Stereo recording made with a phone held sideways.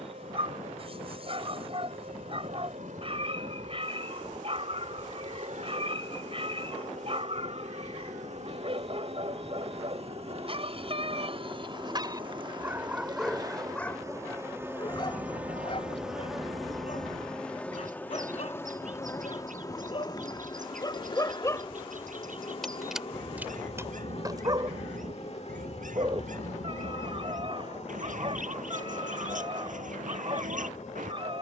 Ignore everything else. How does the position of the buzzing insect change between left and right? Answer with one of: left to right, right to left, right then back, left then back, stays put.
right to left.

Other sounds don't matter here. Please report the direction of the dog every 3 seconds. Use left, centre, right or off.
right, right, right, right, centre, left, left, centre, right, right, right.